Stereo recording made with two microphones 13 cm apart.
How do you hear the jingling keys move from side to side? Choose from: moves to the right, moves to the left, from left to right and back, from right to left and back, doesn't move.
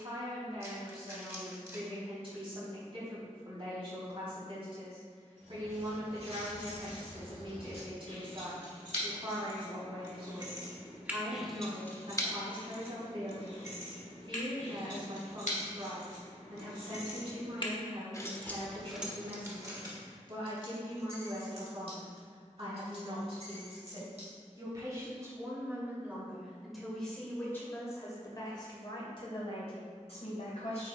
from right to left and back.